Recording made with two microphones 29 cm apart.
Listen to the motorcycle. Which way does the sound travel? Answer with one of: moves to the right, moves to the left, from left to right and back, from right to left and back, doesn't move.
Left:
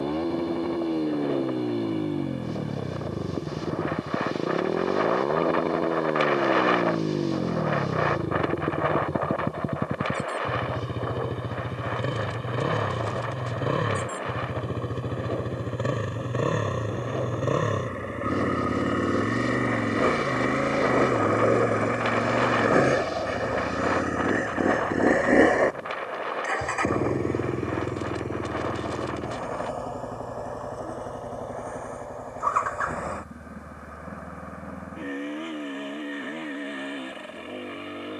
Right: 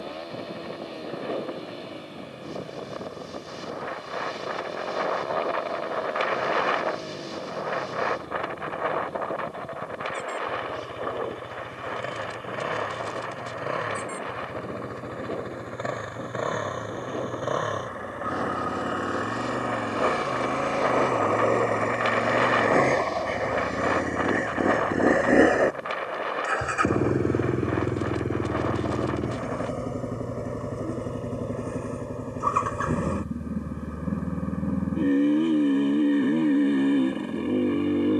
moves to the right.